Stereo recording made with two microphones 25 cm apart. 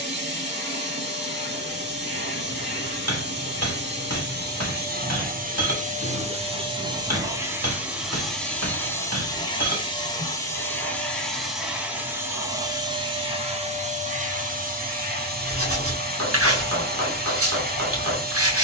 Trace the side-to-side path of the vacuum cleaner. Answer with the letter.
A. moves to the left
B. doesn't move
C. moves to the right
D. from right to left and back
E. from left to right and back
D.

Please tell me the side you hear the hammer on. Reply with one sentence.
In this clip you hear the hammer on the right.